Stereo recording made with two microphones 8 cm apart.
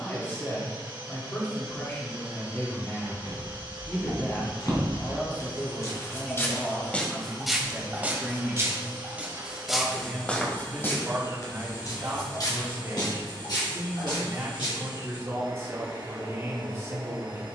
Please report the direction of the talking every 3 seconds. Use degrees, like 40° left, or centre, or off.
30° left, 30° left, centre, 30° right, 30° right, 30° right.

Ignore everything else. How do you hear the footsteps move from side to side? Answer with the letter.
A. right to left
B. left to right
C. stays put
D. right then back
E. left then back
D.